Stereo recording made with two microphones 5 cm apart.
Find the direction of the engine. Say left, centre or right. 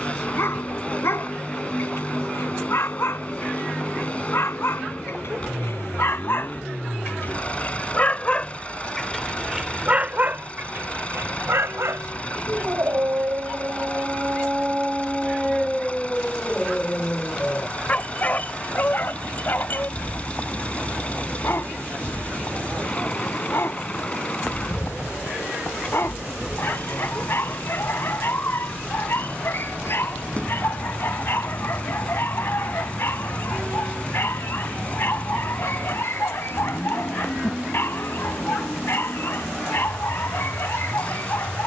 left.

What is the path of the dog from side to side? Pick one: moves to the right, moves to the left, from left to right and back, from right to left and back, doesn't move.
from left to right and back.